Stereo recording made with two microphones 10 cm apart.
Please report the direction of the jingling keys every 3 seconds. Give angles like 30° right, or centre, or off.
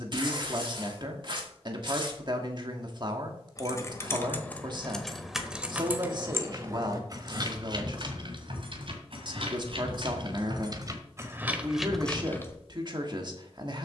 off, 10° left, 40° right, 40° right, 20° left.